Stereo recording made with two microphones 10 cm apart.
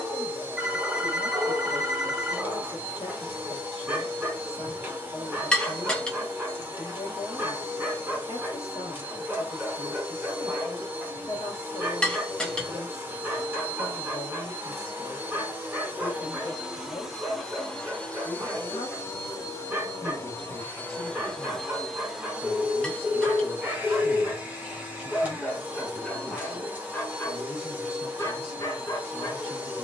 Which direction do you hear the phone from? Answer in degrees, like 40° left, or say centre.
10° right.